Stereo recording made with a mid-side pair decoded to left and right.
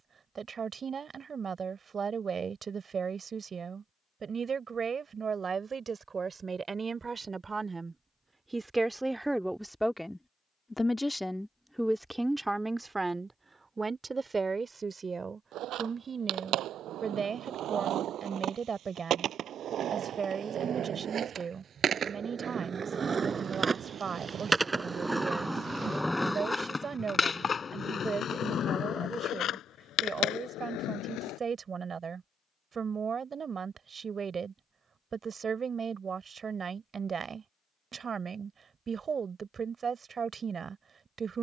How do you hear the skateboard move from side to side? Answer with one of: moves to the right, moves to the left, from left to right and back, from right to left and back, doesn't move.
moves to the left.